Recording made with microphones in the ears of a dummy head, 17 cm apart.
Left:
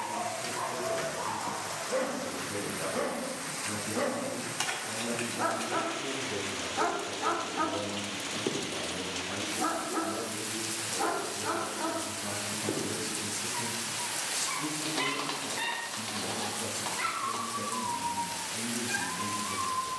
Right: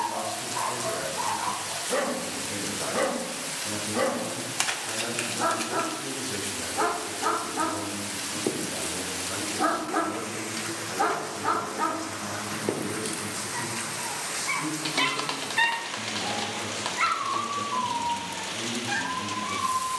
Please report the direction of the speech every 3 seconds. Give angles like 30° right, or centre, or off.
70° right, 60° right, 40° right, centre, 20° left, 20° left, 20° left.